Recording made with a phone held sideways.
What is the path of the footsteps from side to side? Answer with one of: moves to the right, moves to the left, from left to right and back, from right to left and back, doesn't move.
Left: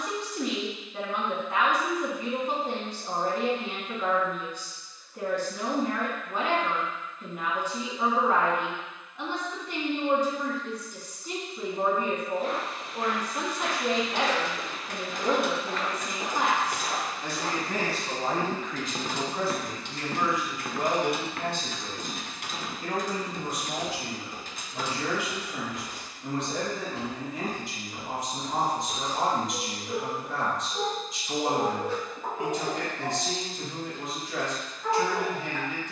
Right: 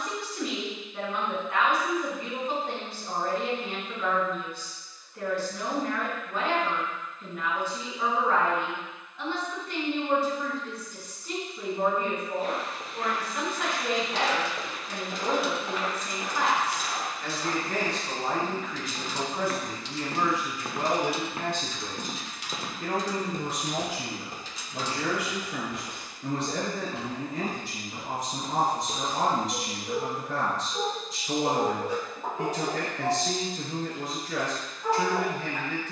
from right to left and back.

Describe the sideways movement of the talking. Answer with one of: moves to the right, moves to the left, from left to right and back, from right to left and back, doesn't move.
moves to the right.